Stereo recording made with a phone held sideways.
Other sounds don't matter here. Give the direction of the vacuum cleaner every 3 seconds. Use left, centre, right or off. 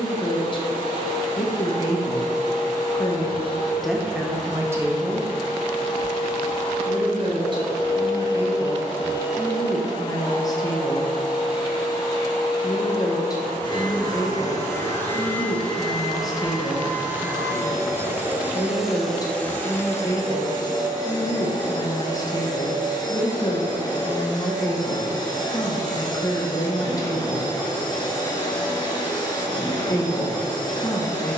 left, left, left, left, left, centre, centre, left, left, left, left.